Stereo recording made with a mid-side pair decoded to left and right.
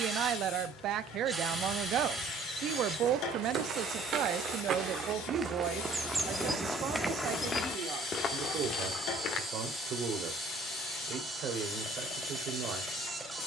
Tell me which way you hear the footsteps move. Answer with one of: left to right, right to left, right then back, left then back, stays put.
right to left.